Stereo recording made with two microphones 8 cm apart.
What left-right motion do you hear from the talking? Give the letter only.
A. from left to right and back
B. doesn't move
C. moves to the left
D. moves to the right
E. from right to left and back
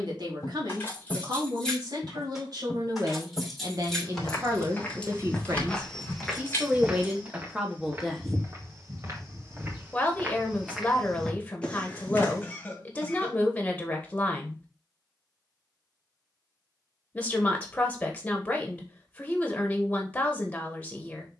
C.